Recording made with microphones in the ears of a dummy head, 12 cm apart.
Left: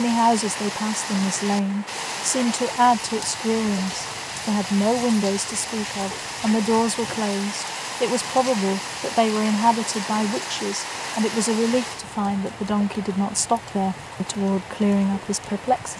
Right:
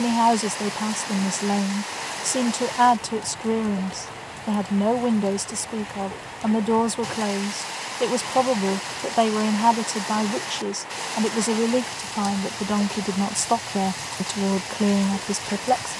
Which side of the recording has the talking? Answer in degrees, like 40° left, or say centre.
centre.